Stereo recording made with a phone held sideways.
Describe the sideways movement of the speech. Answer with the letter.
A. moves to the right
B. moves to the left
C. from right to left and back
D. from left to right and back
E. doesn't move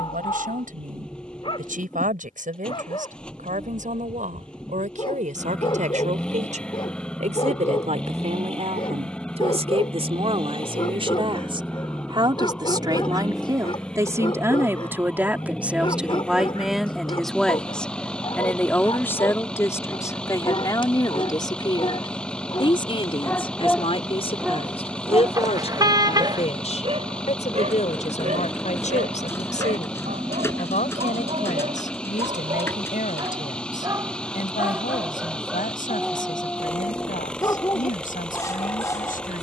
B.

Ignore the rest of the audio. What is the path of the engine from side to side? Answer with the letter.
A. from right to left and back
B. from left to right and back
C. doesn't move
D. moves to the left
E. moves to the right
C.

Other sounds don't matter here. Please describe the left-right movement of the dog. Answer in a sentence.
In this clip you hear the dog go right and come back.